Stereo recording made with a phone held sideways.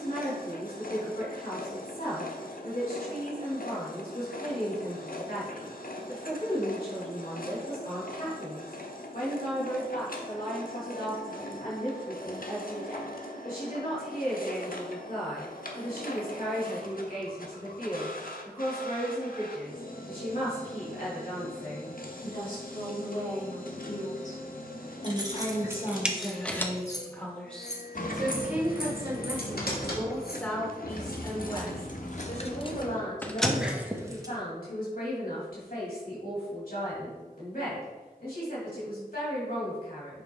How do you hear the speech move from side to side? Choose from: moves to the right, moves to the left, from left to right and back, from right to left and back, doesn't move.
from left to right and back.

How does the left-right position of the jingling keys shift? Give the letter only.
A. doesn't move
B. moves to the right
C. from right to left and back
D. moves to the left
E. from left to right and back
C.